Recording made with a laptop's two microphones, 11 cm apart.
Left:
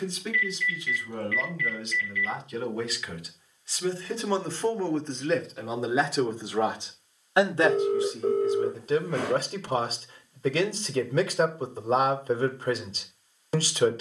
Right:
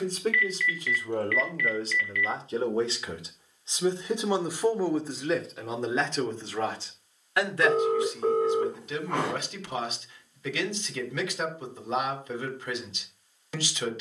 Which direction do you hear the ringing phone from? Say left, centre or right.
right.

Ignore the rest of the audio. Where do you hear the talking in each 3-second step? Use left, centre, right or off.
right, centre, left, left, left.